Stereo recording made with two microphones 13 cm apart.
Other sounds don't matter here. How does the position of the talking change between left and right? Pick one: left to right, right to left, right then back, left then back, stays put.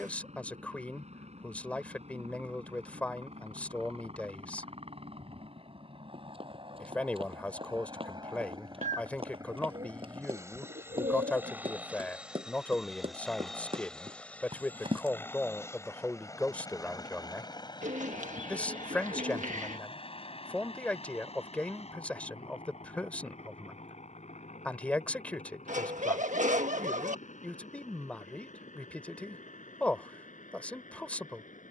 stays put.